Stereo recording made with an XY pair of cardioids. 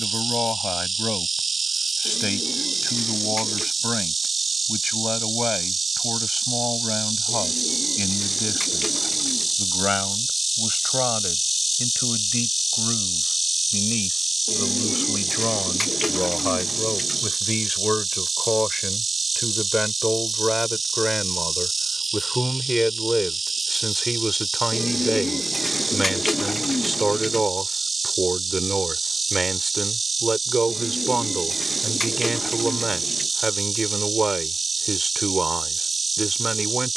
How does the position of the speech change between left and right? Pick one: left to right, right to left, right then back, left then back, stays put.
left to right.